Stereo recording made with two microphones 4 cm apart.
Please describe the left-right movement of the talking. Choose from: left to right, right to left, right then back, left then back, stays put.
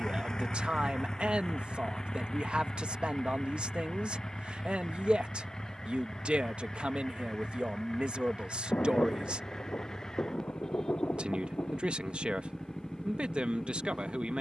stays put.